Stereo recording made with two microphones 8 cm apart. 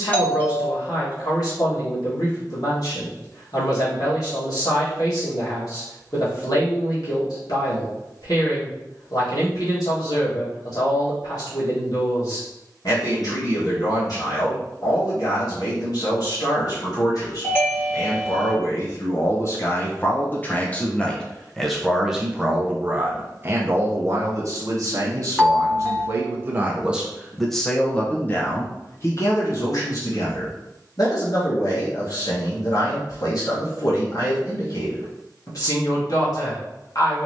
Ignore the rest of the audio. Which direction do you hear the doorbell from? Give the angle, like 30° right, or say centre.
20° left.